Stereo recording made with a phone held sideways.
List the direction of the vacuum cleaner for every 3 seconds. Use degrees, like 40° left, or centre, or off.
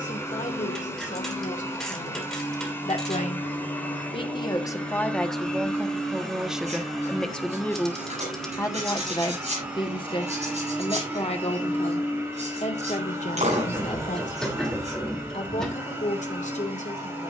20° left, 10° left, centre, 10° right, 20° right, 20° right.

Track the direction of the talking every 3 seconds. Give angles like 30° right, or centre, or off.
70° left, 20° left, 10° left, 40° left, 60° left, 70° left.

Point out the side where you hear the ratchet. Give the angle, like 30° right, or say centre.
centre.